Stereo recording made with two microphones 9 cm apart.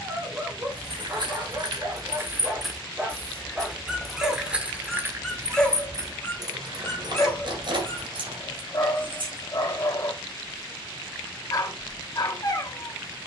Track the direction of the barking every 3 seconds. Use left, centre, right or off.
right, centre, left, left, left.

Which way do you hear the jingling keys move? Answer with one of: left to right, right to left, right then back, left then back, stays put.
left then back.